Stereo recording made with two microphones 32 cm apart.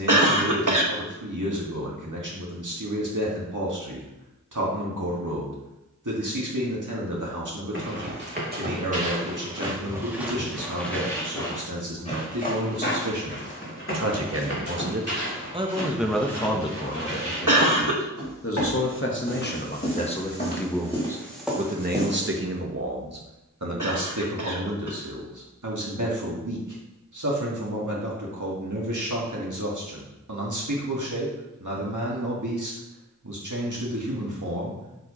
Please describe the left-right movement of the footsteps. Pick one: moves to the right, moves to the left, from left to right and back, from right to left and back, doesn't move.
from right to left and back.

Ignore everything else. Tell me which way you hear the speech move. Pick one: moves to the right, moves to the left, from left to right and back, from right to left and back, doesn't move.
from right to left and back.